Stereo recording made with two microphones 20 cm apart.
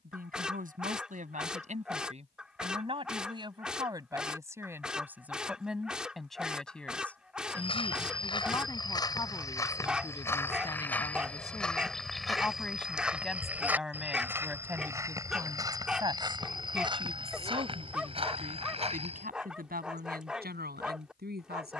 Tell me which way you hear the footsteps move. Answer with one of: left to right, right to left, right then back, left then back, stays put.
left to right.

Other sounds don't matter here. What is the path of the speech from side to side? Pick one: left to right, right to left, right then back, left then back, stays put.
left then back.